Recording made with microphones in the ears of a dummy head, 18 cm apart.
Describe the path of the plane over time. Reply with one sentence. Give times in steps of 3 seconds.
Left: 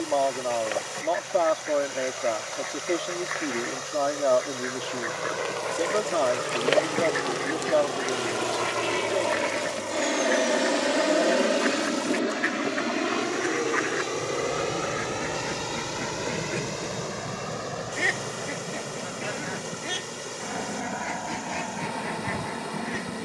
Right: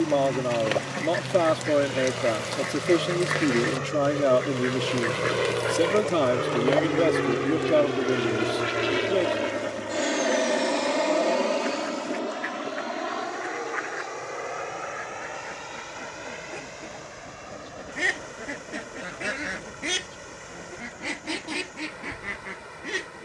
You can hear the plane on the right from 0 s, in the centre from 9 s and on the left from 12 s.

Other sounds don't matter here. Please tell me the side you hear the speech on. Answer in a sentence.
In this clip you hear the speech on the right.